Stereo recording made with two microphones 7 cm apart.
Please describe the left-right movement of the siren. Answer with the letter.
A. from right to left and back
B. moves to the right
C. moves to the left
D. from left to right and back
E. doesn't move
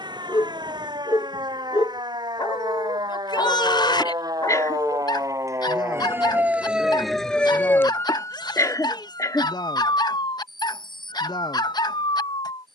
C.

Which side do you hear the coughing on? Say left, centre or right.
left.